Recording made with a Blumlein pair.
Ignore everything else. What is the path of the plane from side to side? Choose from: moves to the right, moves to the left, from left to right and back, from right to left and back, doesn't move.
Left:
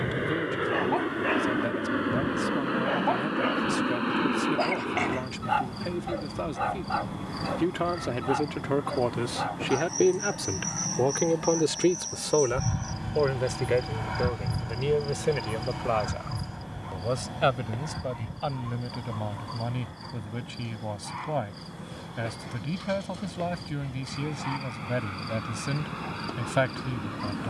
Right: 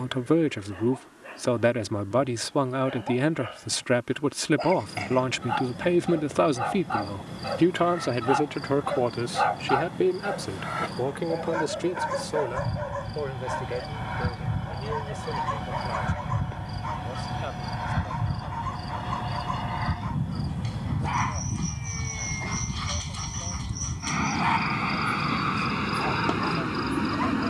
moves to the right.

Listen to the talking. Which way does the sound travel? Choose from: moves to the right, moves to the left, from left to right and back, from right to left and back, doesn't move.
moves to the left.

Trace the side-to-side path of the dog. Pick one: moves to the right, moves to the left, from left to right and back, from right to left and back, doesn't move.
moves to the right.